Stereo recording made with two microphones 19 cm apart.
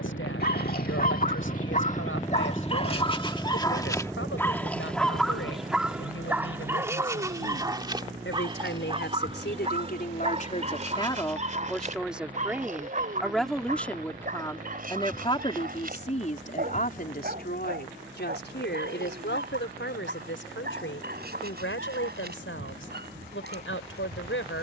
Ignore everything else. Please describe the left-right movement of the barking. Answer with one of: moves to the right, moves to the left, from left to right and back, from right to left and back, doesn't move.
moves to the right.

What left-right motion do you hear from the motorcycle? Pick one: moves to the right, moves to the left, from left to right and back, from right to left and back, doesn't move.
moves to the right.